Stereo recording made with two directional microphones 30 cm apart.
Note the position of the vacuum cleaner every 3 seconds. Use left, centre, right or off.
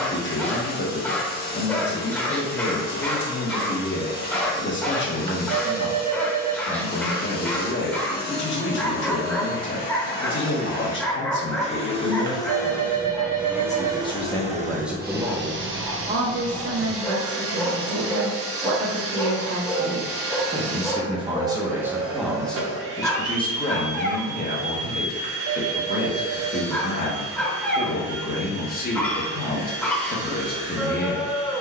left, left, left, left, centre, right, right, right, right, right, right.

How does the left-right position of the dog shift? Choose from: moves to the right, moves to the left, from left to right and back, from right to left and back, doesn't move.
doesn't move.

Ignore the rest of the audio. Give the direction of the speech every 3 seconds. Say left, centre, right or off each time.
left, left, left, left, left, right, right, centre, left, left, left.